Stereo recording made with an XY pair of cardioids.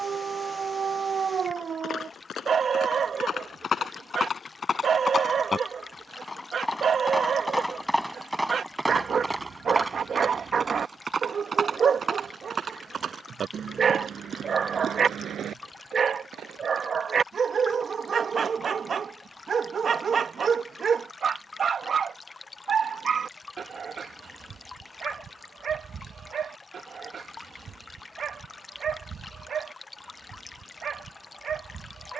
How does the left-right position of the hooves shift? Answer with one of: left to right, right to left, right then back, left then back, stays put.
left to right.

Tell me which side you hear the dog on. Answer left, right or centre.
right.